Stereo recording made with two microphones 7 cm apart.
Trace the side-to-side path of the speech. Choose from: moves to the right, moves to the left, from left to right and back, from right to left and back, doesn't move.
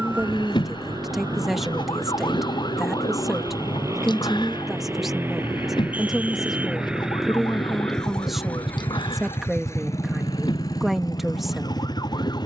doesn't move.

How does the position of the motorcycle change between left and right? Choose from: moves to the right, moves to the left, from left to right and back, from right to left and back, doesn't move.
moves to the left.